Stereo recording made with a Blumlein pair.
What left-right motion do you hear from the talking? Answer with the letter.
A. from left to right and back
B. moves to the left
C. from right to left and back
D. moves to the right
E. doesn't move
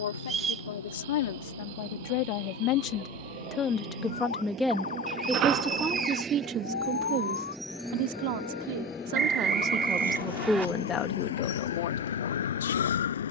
A.